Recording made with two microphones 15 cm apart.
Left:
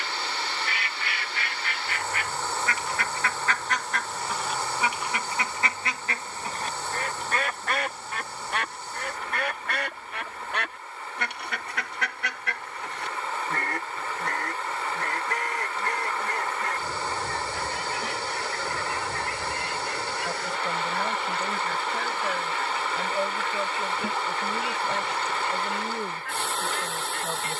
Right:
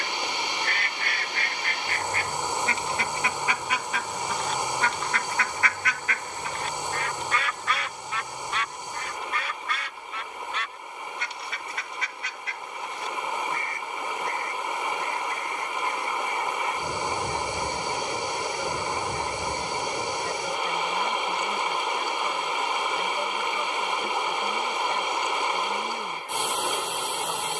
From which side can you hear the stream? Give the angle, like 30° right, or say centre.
20° right.